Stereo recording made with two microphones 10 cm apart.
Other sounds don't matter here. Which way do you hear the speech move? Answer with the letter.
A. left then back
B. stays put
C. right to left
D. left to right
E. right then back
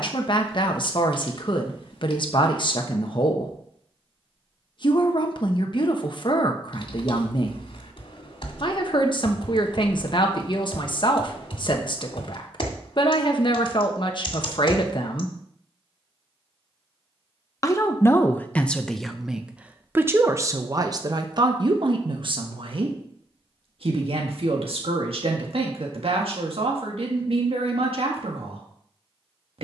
D.